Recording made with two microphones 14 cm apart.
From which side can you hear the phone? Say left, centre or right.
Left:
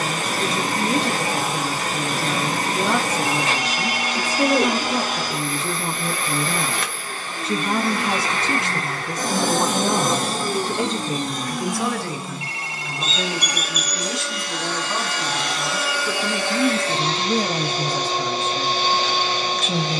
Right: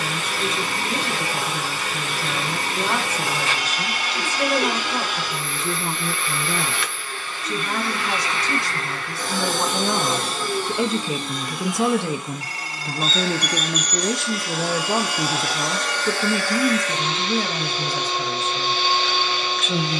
right.